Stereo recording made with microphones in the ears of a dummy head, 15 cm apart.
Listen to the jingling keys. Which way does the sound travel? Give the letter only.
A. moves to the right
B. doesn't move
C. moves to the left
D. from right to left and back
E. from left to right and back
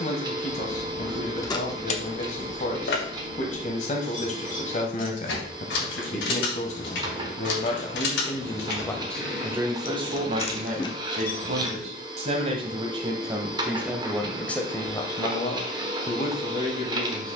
D.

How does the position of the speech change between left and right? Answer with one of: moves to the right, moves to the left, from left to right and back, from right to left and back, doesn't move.
from left to right and back.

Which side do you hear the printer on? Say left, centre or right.
right.